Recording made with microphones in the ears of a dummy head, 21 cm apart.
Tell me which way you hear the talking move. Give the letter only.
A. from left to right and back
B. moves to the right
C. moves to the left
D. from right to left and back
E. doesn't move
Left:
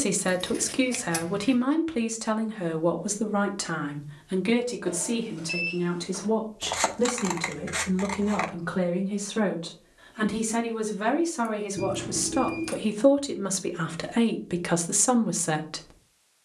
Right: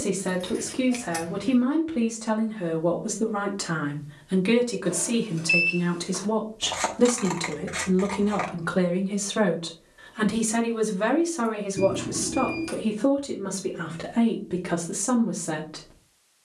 A.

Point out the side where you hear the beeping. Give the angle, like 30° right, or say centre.
20° right.